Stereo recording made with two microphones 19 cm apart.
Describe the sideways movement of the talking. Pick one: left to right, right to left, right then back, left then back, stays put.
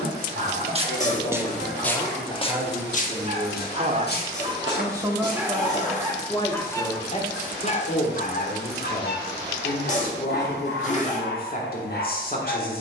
right then back.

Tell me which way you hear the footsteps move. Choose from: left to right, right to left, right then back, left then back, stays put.
right to left.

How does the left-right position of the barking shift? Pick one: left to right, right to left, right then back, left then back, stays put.
right to left.